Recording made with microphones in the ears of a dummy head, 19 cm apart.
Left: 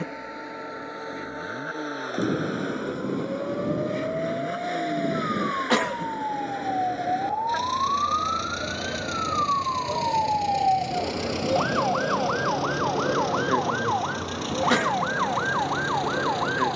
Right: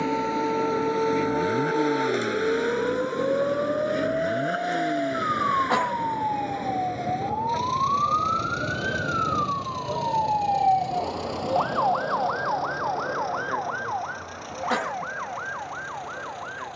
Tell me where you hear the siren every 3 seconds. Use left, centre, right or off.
right, right, right, centre, left, left.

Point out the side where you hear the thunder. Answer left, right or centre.
left.